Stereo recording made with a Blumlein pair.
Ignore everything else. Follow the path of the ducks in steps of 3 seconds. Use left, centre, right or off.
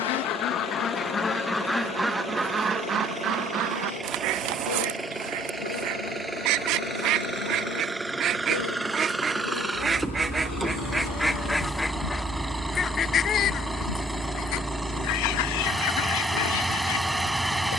centre, right, right, centre, left, left.